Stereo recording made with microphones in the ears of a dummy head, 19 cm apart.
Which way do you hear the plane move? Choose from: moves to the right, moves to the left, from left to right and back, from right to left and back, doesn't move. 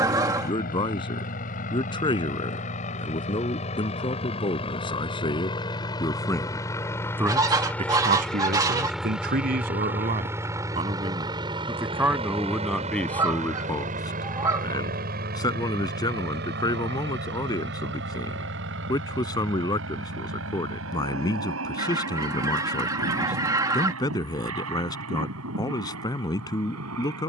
moves to the right.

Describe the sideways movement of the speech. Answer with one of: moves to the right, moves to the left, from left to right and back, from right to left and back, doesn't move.
from left to right and back.